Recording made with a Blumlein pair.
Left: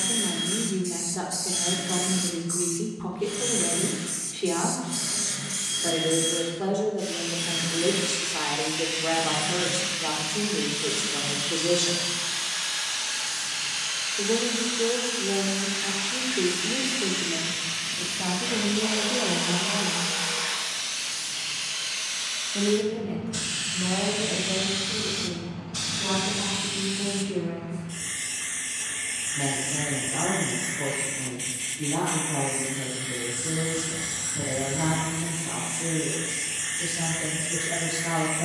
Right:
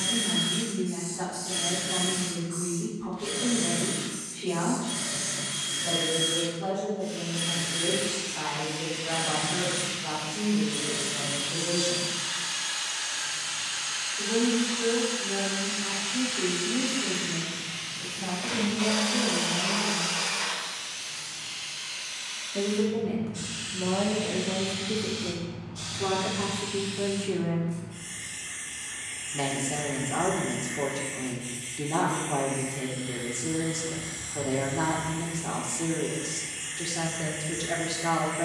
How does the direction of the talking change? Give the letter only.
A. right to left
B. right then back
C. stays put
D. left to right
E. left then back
D.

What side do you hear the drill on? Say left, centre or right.
right.